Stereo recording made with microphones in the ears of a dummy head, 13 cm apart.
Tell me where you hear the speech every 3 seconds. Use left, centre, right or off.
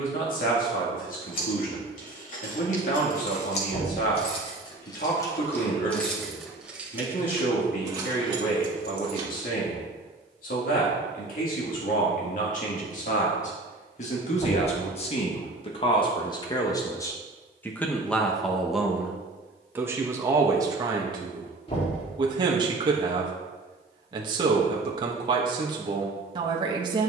left, left, left, left, left, left, centre, right, right.